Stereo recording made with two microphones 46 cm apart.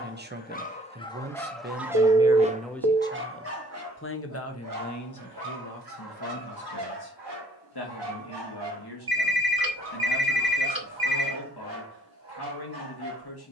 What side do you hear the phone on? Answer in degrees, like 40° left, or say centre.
50° right.